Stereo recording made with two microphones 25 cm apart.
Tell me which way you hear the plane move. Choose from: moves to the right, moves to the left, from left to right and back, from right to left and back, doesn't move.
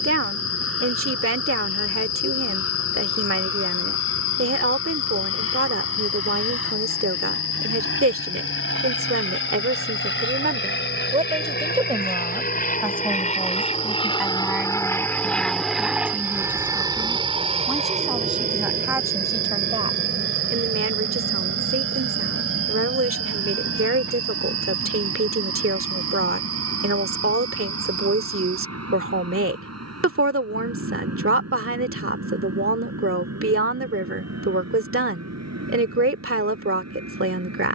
moves to the right.